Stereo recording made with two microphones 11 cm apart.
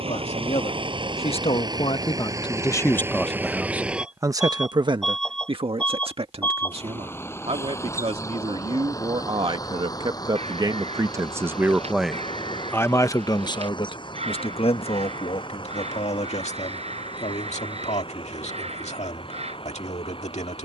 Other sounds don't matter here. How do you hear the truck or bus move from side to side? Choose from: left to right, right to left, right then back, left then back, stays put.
right to left.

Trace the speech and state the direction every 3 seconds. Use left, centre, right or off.
left, right, right, right, left, left, left.